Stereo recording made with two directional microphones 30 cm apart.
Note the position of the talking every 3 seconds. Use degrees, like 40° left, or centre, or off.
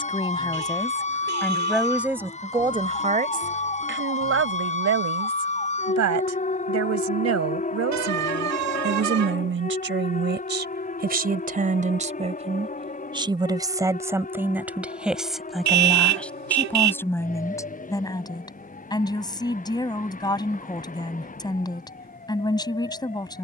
centre, 50° right, 60° right, 40° right, 10° right, centre, 10° left, 10° left.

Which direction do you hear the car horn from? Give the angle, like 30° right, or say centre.
60° right.